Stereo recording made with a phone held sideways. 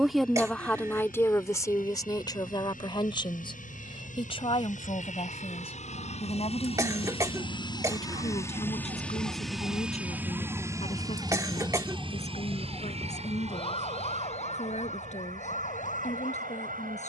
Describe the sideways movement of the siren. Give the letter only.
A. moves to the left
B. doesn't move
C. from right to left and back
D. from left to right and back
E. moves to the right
A.